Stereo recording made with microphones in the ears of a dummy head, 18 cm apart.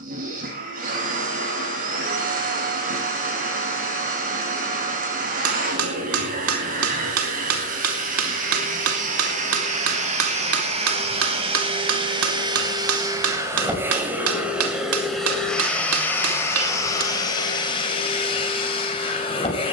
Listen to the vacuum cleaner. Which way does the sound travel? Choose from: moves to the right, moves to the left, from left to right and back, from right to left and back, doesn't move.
moves to the left.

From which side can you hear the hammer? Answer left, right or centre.
right.